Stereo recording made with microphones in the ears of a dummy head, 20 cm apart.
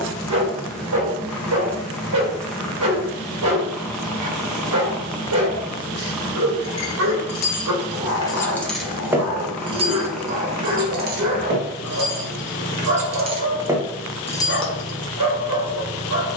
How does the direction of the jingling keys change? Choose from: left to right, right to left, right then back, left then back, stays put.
right then back.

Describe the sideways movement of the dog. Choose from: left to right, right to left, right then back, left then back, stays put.
stays put.